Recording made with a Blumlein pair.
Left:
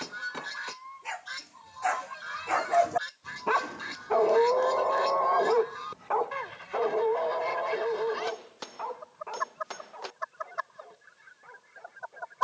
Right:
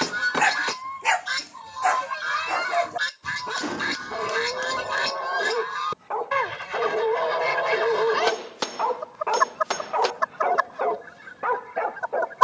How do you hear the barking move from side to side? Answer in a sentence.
You can hear the barking move from right to left and back again.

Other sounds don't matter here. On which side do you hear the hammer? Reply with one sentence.
You can hear the hammer on the right.